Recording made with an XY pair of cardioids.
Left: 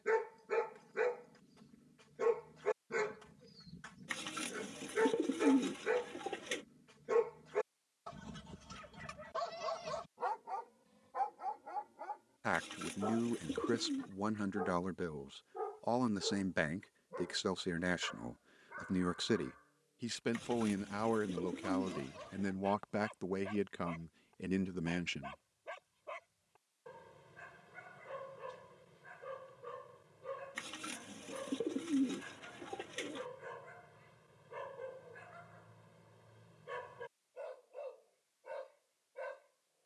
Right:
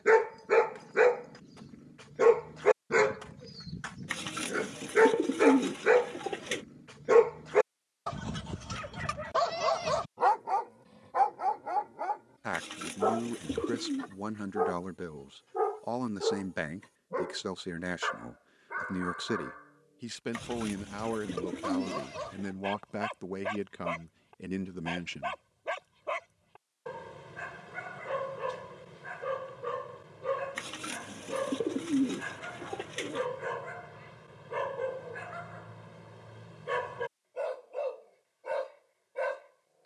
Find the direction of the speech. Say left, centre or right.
centre.